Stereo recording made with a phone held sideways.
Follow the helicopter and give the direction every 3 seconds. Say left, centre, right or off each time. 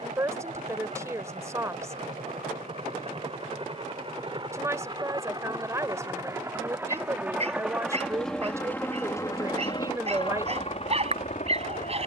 right, right, centre, left.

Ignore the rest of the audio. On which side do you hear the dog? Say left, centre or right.
right.